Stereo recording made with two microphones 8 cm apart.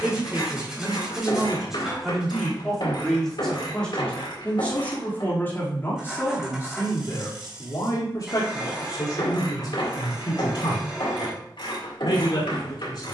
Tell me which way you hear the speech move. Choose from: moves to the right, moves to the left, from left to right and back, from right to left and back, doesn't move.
moves to the left.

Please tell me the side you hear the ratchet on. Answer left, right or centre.
left.